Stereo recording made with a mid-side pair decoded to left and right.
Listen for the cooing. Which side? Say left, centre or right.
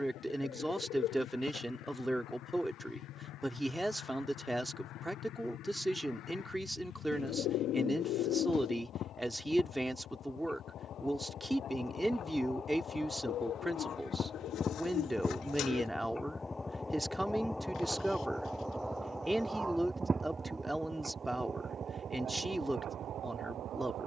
left.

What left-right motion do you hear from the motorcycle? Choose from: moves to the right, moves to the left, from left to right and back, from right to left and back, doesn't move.
moves to the right.